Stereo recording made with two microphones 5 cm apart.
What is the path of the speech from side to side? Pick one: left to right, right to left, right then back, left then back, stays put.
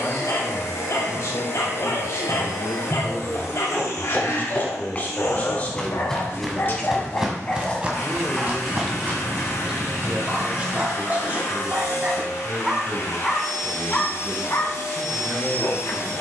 left to right.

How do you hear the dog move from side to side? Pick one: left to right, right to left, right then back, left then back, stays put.
right then back.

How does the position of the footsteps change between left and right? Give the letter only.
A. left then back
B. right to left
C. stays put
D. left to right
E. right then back
D.